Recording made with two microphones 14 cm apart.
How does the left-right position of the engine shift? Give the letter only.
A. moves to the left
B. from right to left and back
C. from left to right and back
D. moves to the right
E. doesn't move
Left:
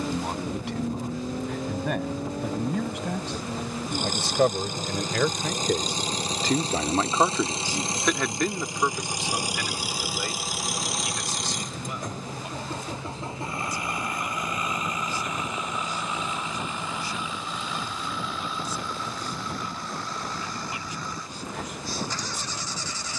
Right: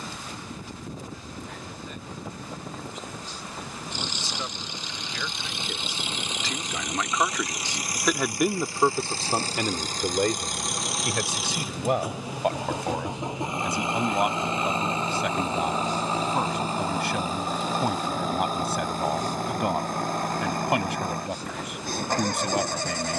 D.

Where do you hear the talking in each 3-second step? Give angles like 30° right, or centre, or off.
80° left, 60° left, 10° left, 50° right, 70° right, 70° right, 70° right, 70° right.